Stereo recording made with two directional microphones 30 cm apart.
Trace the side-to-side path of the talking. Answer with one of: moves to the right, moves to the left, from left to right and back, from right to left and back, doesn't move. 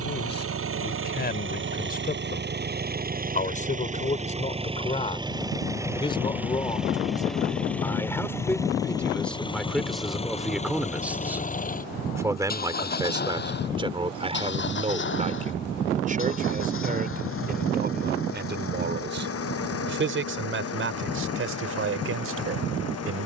moves to the right.